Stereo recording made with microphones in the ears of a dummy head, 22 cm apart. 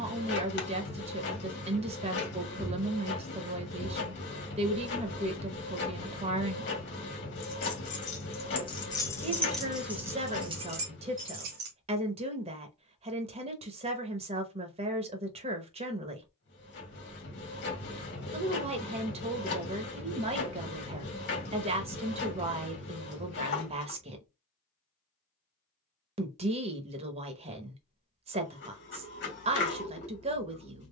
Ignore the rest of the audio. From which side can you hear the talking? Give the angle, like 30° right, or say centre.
30° right.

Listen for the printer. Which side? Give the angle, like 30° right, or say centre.
50° left.